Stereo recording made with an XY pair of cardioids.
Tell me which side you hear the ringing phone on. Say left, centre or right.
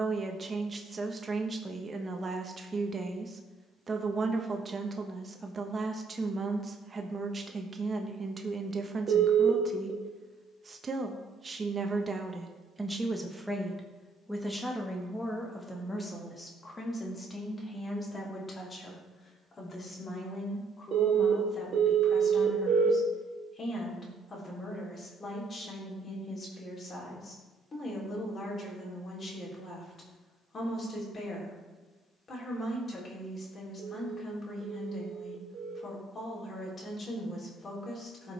right.